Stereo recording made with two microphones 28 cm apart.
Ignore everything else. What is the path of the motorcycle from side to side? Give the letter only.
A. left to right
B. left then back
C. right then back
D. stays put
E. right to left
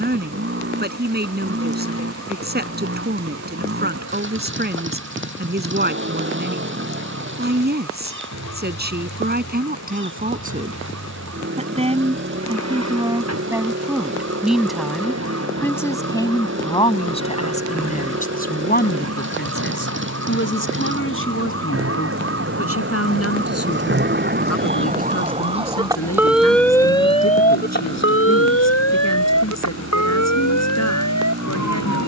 D.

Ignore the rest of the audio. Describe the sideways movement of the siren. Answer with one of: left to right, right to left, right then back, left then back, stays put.
right to left.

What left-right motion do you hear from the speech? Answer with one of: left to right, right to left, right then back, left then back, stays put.
right to left.